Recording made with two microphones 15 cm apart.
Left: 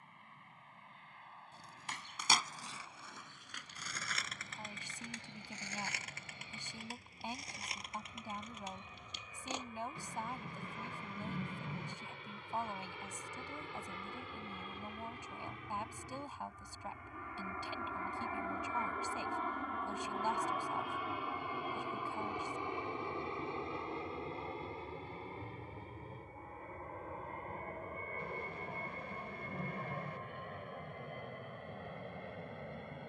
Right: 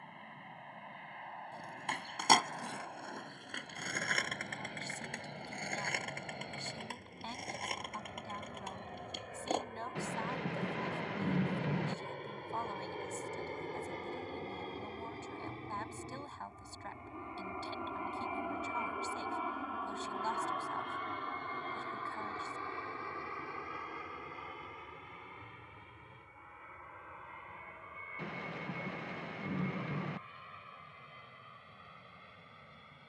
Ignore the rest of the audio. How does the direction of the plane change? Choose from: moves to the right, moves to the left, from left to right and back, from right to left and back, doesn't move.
moves to the left.